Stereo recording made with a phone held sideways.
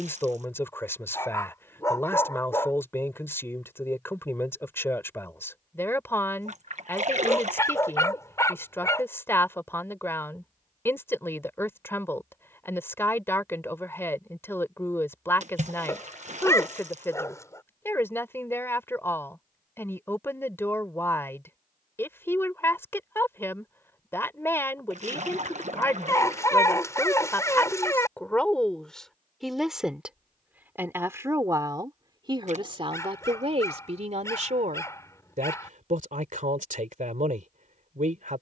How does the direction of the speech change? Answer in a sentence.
You can hear the speech move from left to right.